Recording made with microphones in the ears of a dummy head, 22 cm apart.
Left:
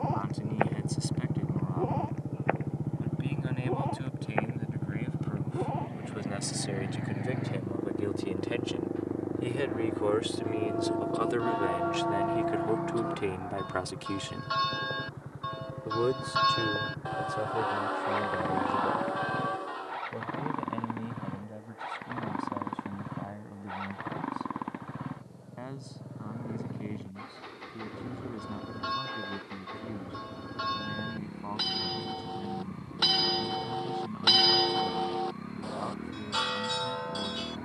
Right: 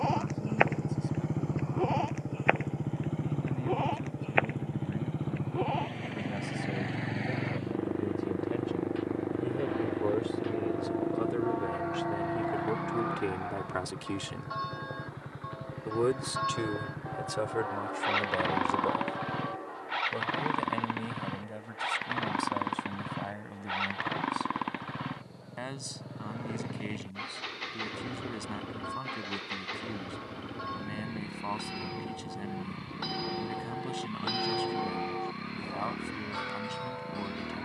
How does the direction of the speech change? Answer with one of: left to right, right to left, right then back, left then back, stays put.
left to right.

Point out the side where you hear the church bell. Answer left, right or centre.
left.